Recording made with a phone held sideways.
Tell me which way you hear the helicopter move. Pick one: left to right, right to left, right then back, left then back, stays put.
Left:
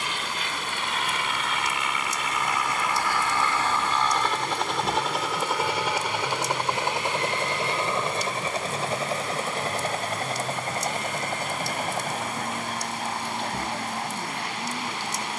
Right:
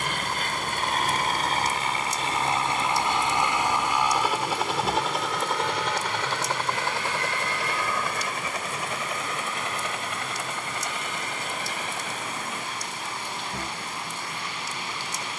right to left.